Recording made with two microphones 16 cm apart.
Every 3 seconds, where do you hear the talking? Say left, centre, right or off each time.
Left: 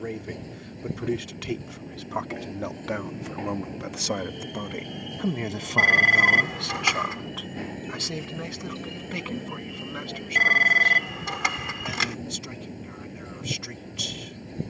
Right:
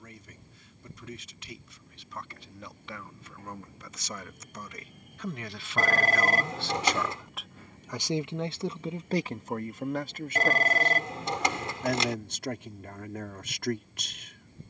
left, left, centre, right, right.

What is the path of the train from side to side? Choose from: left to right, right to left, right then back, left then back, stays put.
stays put.